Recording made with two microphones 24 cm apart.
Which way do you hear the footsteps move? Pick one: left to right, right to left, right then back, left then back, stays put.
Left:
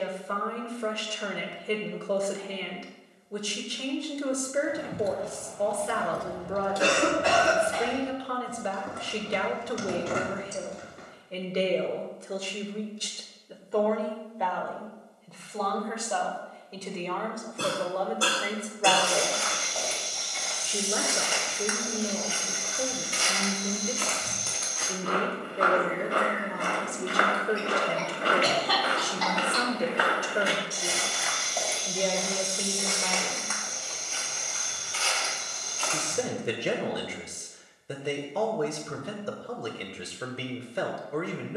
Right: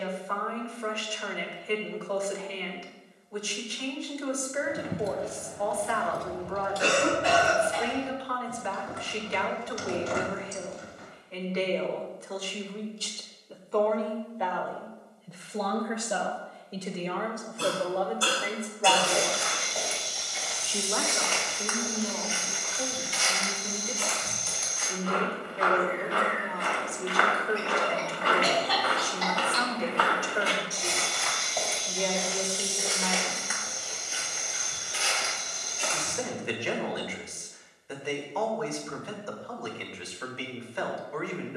left then back.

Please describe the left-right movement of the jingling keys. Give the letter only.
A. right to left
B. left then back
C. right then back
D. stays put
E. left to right
A.